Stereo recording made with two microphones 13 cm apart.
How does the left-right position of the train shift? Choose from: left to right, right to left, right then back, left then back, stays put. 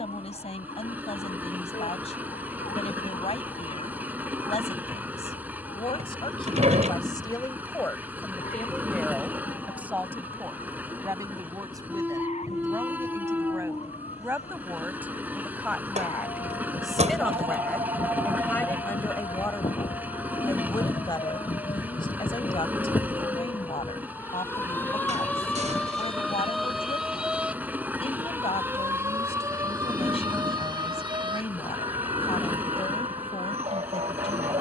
stays put.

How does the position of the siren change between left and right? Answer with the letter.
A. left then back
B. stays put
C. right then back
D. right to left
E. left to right
E.